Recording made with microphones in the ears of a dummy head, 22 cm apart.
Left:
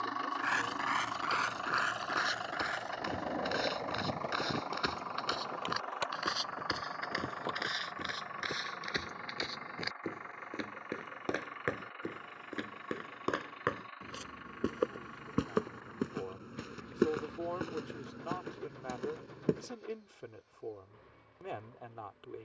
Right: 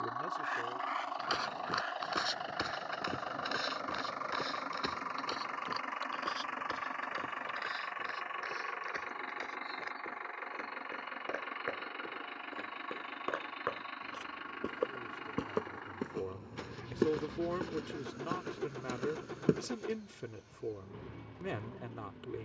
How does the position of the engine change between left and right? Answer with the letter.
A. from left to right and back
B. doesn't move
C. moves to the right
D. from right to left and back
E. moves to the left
C.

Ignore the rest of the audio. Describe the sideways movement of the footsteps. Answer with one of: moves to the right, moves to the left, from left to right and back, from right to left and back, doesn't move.
from right to left and back.